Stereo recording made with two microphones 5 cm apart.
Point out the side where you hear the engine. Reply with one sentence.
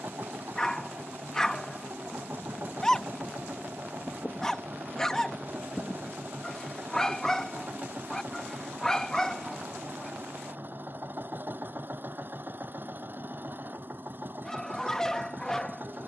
You can hear the engine on the right.